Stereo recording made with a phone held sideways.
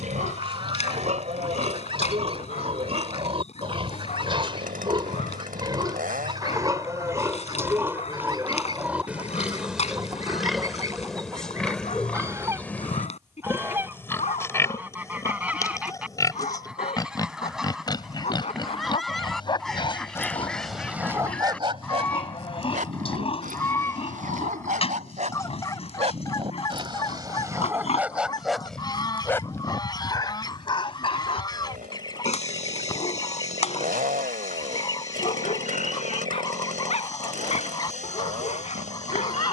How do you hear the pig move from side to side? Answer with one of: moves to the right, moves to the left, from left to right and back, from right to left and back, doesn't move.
moves to the left.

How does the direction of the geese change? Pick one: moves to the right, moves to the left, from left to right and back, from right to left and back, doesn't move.
moves to the left.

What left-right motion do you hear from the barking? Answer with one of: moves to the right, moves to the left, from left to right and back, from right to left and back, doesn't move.
from left to right and back.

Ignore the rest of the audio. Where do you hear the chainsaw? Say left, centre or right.
right.